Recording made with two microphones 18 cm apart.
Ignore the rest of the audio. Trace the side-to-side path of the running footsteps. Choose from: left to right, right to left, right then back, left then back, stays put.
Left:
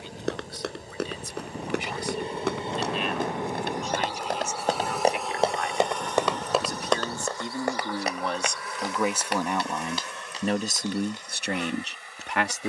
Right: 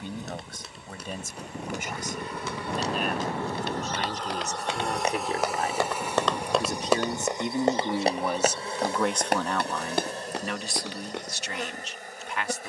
left to right.